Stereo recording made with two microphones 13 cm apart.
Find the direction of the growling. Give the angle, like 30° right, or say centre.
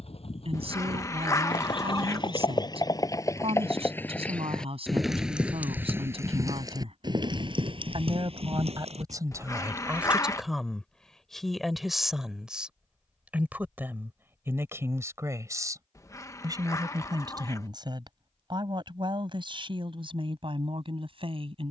20° left.